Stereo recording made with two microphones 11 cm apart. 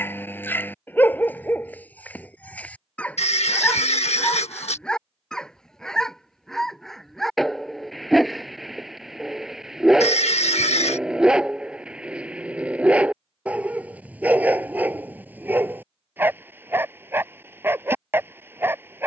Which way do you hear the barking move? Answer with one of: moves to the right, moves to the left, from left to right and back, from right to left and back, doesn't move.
moves to the right.